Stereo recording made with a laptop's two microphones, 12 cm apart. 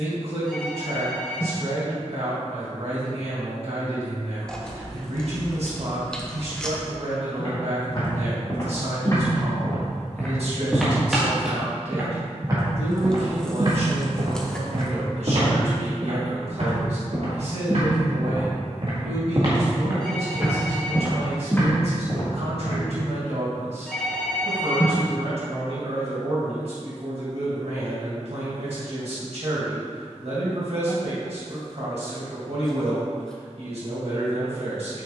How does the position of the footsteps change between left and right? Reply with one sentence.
You can hear the footsteps move from left to right and back again.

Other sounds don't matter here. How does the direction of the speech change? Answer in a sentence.
In this clip you hear the speech stay in one place.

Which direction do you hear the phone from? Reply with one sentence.
In this clip you hear the phone in the centre.